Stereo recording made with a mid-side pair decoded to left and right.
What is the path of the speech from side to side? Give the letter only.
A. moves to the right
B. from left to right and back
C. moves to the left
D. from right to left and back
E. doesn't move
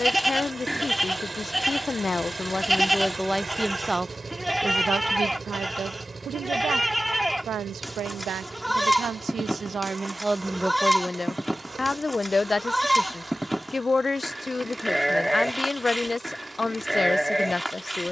B.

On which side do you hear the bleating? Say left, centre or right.
centre.